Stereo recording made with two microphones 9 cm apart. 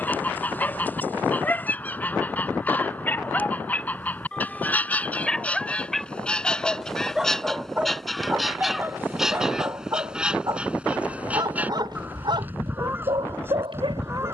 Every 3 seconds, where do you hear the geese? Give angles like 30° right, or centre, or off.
20° left, 20° left, centre, 10° right, 20° right.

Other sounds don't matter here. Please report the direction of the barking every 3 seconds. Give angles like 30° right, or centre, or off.
20° left, 10° left, 10° right, 40° right, 70° right.